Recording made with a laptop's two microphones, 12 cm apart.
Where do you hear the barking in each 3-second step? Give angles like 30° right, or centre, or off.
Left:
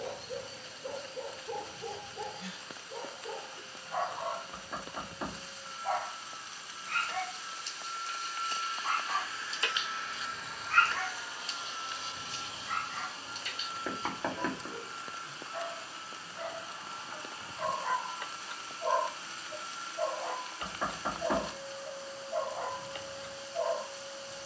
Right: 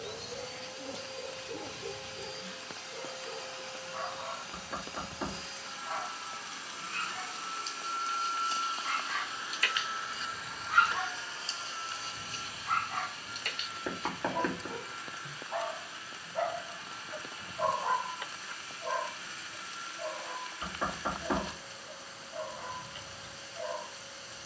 70° left, 70° left, 50° left, centre, 50° right, 50° right, 40° left, 60° left.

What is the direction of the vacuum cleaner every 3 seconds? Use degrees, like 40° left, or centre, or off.
70° right, 70° right, 60° right, centre, 30° left, 30° left, 30° left, 30° left.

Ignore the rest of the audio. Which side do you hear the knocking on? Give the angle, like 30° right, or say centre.
centre.